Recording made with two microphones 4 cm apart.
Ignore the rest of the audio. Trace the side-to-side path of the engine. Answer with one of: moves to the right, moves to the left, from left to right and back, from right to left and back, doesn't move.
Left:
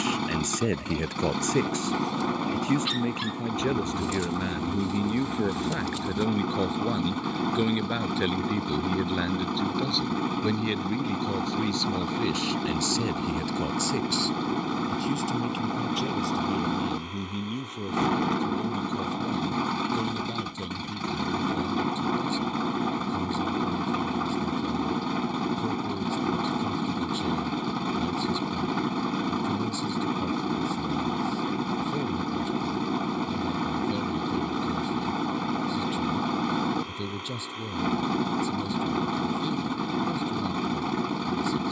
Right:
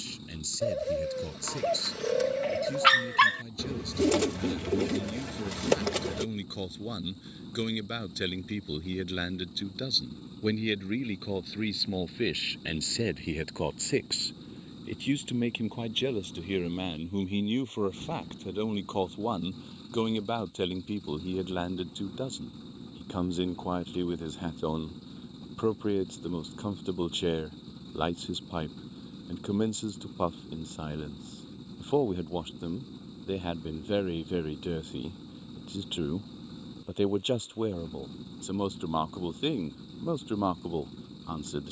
doesn't move.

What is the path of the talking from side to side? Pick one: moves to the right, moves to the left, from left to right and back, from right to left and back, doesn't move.
moves to the right.